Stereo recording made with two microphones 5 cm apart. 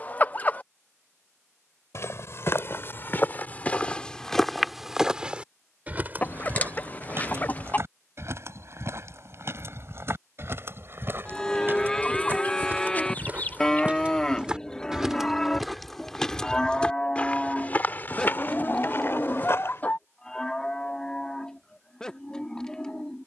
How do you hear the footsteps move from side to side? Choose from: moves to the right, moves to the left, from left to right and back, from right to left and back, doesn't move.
from left to right and back.